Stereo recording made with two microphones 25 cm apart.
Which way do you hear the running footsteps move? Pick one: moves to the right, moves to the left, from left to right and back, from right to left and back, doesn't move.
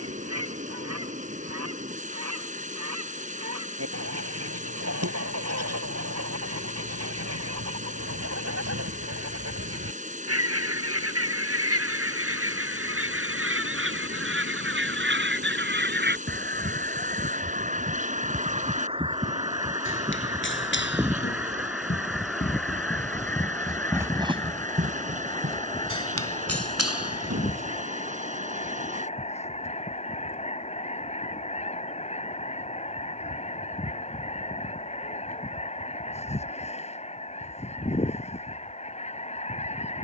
moves to the right.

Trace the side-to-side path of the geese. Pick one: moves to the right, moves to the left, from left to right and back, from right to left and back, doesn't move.
moves to the left.